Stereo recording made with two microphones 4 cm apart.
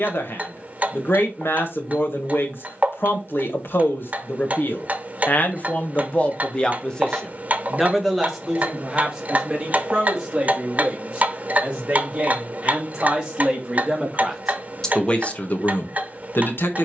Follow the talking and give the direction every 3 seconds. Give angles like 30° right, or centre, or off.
70° left, 60° left, 10° left, 20° right, 20° right, 50° left.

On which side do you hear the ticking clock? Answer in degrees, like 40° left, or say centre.
40° right.